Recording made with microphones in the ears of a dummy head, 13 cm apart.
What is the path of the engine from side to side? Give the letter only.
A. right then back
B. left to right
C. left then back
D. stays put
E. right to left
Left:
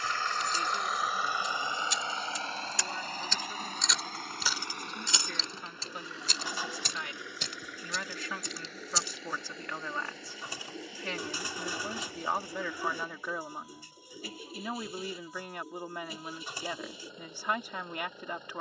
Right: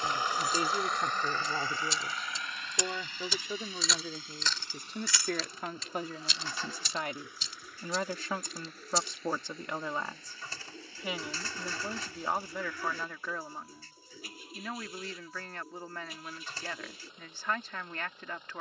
E.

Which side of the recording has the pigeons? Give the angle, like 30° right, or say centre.
10° left.